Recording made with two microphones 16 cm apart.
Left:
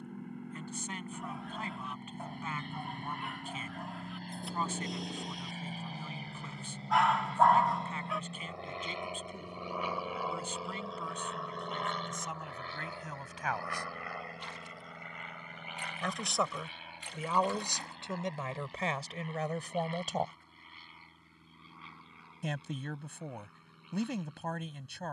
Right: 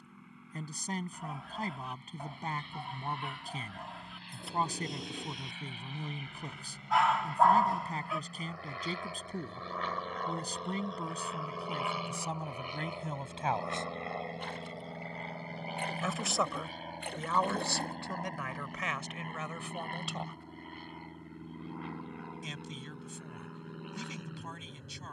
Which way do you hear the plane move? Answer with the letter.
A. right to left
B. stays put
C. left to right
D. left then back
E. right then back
C.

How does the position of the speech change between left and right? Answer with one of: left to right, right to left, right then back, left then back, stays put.
right to left.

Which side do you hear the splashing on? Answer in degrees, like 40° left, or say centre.
60° right.